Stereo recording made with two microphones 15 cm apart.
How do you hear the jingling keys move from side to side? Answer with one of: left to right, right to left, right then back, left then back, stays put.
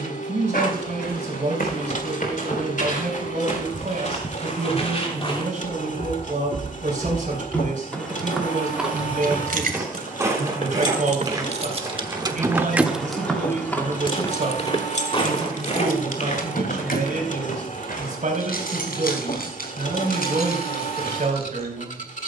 right to left.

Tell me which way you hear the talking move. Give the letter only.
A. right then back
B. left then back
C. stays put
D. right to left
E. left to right
C.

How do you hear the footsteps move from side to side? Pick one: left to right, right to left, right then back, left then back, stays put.
right then back.